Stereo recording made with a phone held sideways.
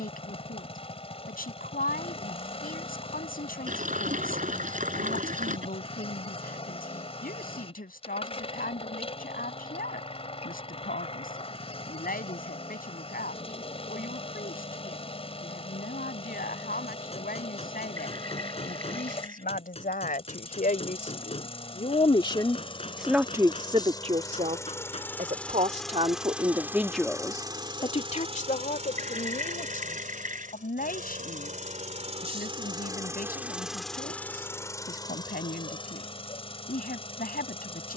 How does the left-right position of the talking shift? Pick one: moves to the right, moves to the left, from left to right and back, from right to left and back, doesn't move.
from left to right and back.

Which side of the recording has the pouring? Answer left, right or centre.
right.